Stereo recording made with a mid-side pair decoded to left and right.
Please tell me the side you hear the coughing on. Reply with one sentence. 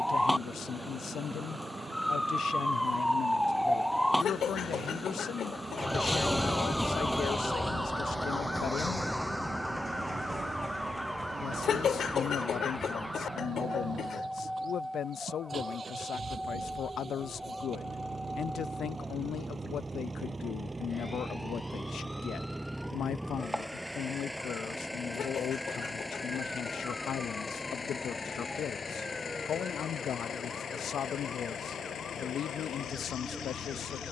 You can hear the coughing on the left.